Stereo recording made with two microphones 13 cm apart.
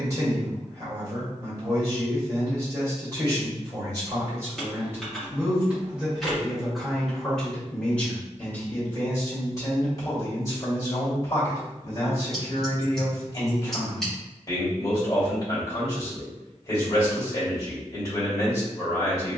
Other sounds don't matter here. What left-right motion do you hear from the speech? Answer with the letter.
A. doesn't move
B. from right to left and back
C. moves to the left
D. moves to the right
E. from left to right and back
C.